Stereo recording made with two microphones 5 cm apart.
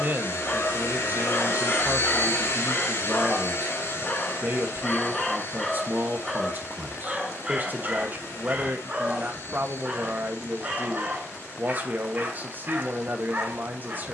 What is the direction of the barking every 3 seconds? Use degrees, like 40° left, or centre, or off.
40° left, 20° left, 10° right, 30° right, 40° right.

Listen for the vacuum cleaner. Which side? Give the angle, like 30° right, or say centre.
70° left.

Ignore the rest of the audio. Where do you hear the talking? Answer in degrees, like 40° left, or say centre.
40° right.